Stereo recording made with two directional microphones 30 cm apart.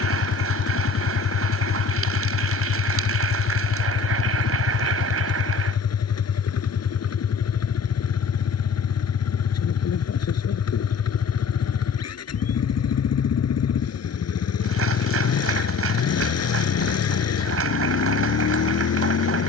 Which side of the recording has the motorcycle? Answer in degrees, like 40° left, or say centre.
50° left.